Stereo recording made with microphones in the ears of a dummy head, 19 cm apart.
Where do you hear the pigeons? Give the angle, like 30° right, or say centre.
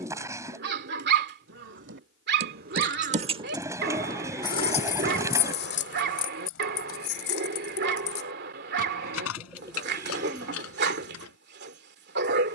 10° right.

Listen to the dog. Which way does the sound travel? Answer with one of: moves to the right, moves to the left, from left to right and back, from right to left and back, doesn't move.
doesn't move.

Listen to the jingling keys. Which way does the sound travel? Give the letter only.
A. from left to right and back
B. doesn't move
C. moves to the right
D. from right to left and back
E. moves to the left
E.